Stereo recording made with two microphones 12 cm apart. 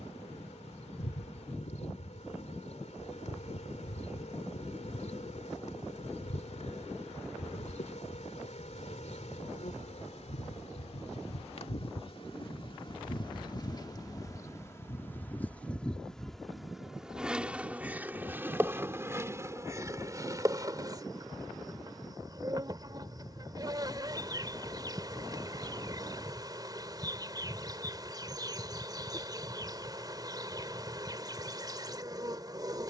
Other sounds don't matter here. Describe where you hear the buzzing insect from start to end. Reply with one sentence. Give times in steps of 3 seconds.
In this clip you hear the buzzing insect on the left from 0 s, in the centre from 15 s and on the right from 18 s.